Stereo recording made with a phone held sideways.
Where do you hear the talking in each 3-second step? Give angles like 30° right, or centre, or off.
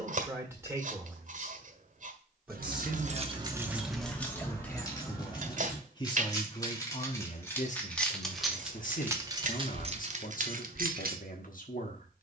10° right, 10° left, 50° left, 60° left.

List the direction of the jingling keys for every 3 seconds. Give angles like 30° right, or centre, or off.
70° right, centre, 10° left, 50° right.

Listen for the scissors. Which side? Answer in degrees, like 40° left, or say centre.
60° right.